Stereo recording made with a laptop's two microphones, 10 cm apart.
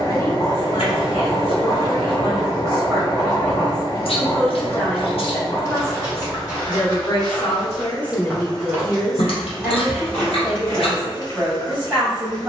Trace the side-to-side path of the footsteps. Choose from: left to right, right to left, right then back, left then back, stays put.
right then back.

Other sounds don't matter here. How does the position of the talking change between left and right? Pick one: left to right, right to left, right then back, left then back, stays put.
left then back.